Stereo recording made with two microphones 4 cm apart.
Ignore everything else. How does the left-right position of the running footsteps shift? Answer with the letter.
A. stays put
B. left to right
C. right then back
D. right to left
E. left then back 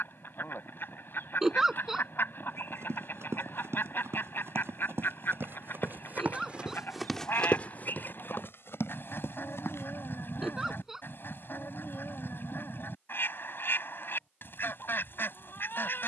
D.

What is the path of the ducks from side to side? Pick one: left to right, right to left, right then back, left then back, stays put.
stays put.